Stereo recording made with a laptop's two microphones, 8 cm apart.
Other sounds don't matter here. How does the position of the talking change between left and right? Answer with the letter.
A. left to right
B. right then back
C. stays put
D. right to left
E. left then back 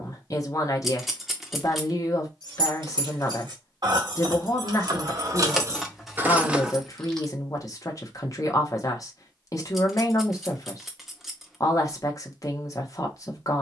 C.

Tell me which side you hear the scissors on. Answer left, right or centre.
centre.